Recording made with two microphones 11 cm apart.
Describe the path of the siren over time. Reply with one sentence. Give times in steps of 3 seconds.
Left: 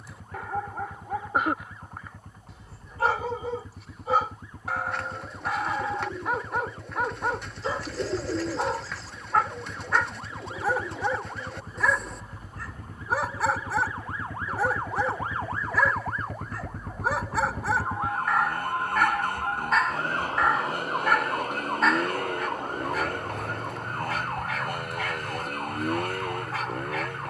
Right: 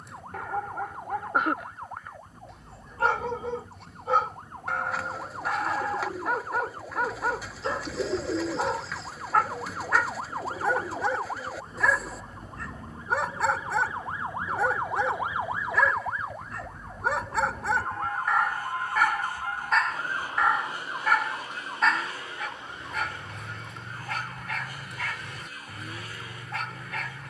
You can hear the siren on the right from 0 s, in the centre from 15 s and on the left from 18 s.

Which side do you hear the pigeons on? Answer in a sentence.
In this clip you hear the pigeons in the centre.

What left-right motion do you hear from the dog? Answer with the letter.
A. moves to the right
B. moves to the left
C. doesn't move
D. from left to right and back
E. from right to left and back
C.